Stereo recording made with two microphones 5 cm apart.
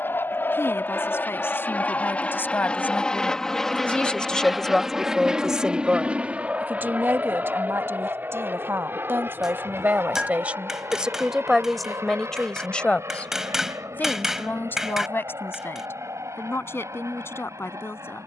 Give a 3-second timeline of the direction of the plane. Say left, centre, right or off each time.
left, centre, right, right, right, right.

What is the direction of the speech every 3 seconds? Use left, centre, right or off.
left, centre, right, right, left, left.